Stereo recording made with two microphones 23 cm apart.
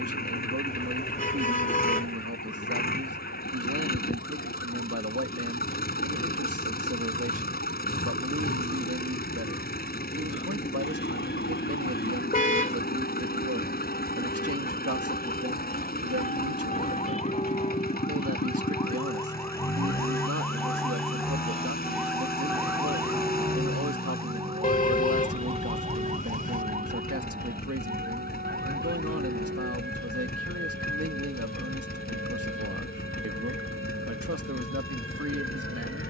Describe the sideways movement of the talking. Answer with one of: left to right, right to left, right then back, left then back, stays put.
stays put.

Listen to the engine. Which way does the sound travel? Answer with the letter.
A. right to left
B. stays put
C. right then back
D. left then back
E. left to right
B.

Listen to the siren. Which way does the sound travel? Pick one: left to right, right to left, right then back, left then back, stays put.
left to right.